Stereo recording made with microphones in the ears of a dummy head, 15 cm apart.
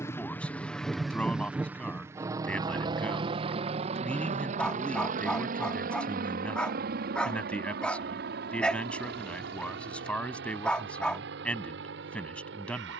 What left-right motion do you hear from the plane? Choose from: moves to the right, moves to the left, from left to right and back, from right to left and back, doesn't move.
moves to the right.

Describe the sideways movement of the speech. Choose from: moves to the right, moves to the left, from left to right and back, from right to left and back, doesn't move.
doesn't move.